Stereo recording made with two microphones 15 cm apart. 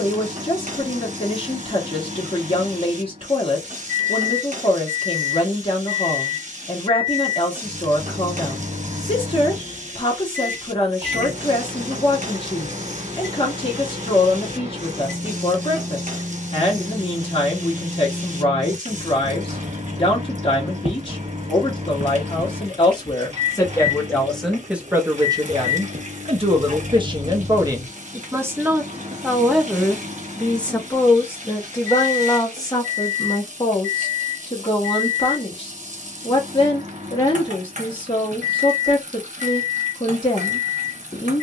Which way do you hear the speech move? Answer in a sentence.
In this clip you hear the speech move from left to right and back again.